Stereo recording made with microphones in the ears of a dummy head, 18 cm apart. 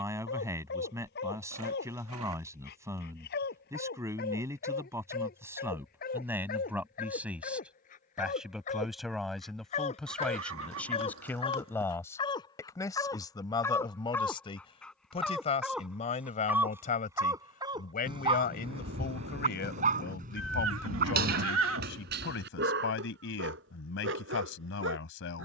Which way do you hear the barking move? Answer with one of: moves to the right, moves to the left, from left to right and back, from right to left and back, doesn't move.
moves to the right.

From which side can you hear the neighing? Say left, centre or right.
right.